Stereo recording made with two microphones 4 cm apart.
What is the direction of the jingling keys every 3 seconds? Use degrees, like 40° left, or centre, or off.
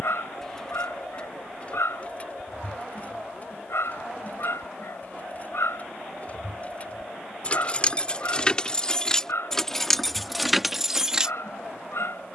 30° left, 40° left, 30° left, centre.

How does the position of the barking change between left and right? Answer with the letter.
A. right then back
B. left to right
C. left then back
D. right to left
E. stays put
E.